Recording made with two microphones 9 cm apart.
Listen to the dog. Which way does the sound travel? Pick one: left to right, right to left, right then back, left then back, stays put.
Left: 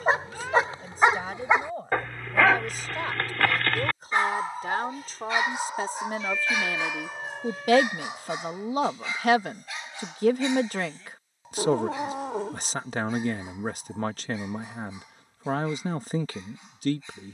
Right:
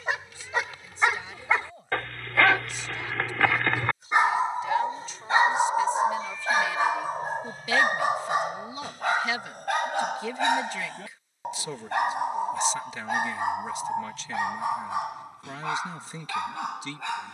left to right.